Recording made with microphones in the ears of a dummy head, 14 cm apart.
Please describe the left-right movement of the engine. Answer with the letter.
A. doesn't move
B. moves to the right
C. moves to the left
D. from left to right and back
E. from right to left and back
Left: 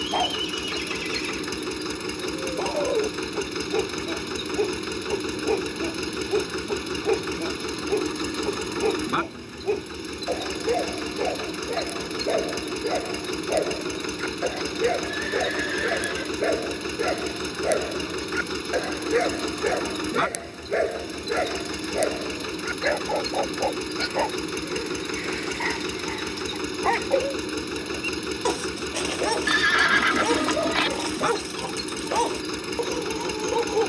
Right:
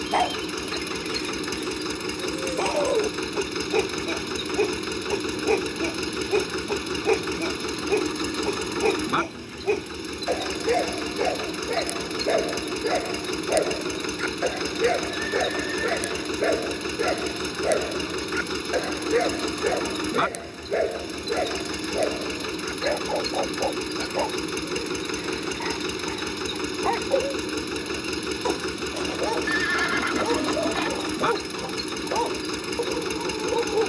A.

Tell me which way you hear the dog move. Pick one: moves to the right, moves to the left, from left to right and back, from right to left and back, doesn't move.
moves to the left.